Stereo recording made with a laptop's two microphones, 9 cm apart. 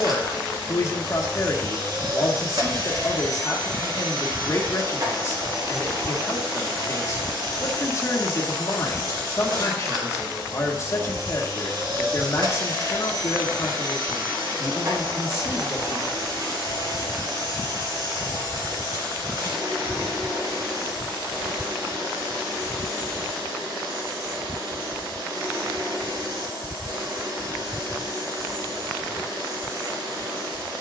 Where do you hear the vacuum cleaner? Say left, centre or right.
right.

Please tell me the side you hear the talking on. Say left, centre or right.
left.